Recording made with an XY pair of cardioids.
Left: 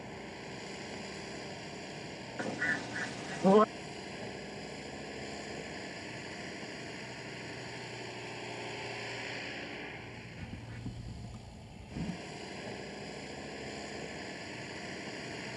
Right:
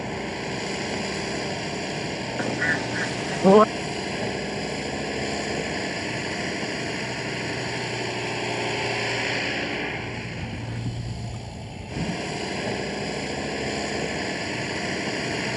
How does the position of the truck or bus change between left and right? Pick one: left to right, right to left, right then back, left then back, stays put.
stays put.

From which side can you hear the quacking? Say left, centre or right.
right.